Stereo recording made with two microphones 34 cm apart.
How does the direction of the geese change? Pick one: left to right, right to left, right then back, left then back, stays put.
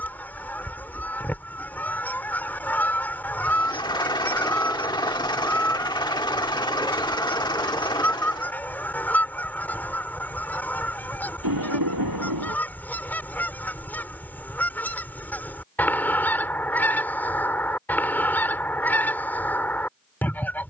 stays put.